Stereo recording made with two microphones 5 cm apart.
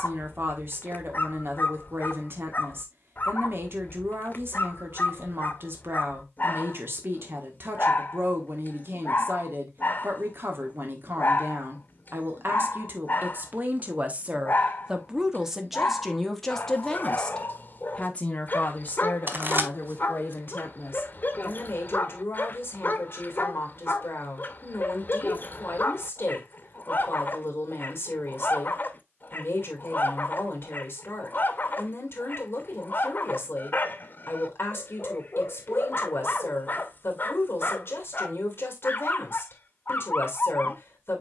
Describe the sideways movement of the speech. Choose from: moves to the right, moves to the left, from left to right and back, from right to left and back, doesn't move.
moves to the left.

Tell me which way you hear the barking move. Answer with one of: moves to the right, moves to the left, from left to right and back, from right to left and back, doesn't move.
doesn't move.